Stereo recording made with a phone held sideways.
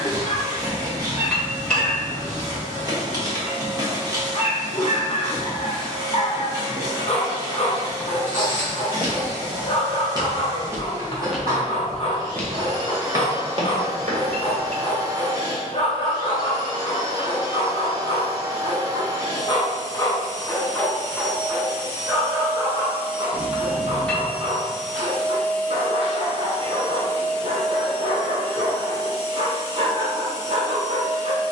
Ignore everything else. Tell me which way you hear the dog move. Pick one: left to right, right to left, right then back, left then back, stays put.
left to right.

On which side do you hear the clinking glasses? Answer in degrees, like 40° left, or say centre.
10° left.